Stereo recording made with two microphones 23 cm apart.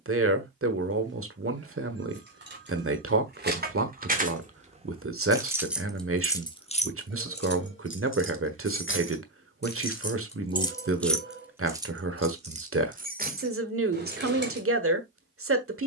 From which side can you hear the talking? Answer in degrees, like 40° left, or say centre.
70° right.